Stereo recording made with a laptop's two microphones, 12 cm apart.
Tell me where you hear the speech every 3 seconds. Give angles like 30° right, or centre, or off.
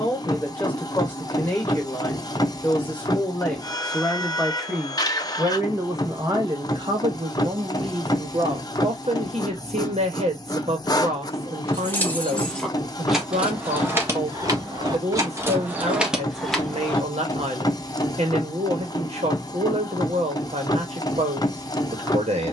20° left, centre, 50° right, 70° right, 70° right, 70° right, 70° right, 70° right.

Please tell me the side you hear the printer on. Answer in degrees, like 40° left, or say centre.
30° left.